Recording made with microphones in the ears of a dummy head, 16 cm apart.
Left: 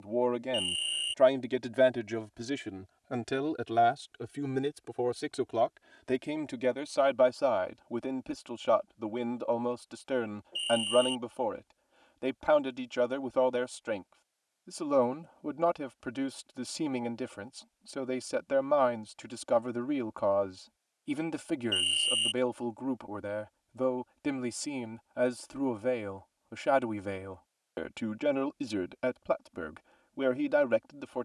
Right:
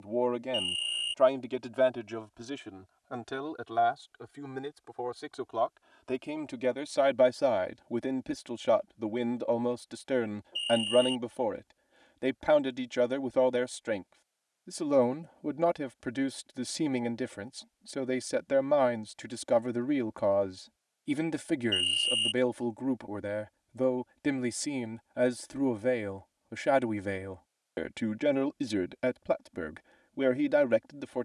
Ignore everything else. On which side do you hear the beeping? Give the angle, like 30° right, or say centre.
10° left.